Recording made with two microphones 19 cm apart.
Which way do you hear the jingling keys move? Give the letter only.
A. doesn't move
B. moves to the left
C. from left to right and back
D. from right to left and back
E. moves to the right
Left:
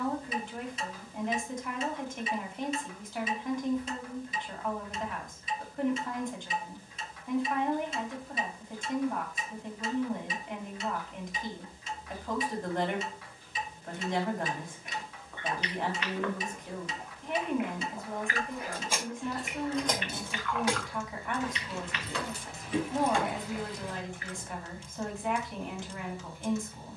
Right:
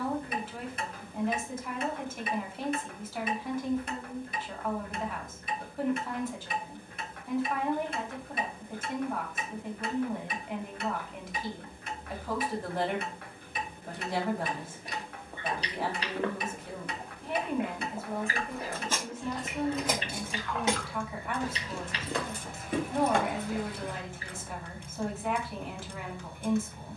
E.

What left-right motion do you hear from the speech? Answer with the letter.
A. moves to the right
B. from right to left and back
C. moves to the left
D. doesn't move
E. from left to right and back
D.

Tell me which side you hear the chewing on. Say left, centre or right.
right.